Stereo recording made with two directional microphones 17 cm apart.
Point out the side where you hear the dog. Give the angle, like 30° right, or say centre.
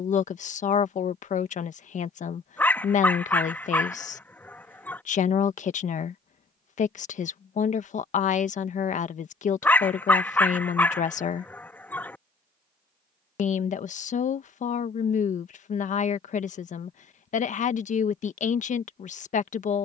10° left.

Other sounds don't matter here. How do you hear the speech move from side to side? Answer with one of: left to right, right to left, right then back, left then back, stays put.
stays put.